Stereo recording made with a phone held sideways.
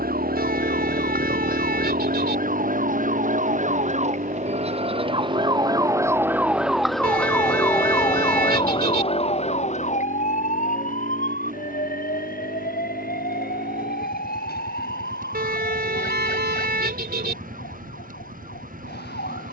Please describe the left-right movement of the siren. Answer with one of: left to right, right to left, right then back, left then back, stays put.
right to left.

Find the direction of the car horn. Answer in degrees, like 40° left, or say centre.
70° right.